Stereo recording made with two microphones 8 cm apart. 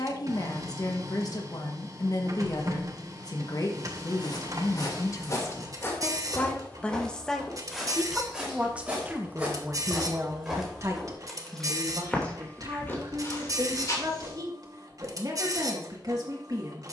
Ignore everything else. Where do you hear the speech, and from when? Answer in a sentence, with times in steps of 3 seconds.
You can hear the speech on the left from 0 s, in the centre from 6 s and on the right from 9 s.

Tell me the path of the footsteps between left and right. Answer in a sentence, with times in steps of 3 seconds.
You can hear the footsteps not at all from 0 s, on the left from 3 s, in the centre from 6 s, on the left from 12 s and not at all from 15 s.